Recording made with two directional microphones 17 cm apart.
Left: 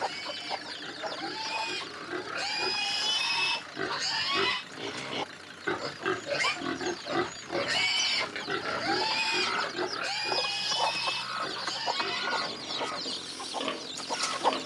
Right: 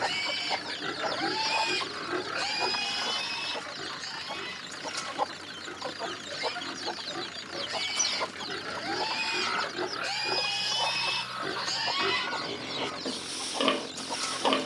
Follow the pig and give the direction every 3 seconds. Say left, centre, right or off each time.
right, left, left, centre, right.